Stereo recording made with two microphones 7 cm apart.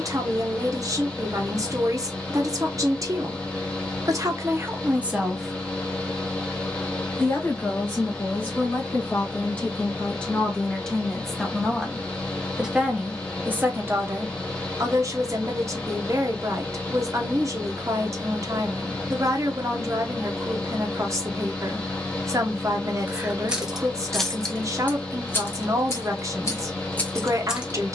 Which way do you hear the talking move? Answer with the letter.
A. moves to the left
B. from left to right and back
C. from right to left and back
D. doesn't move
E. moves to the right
C.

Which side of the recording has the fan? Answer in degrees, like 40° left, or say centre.
10° left.